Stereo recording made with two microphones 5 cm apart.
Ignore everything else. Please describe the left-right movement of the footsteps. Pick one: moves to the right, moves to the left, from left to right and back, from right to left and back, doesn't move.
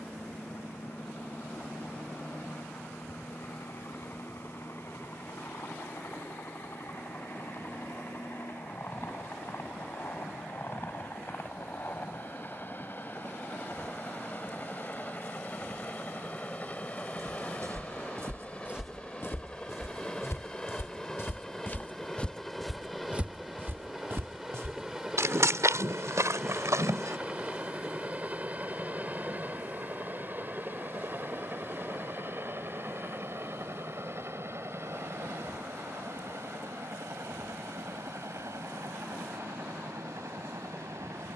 from right to left and back.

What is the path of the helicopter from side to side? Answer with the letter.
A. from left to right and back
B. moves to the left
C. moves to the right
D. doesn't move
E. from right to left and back
C.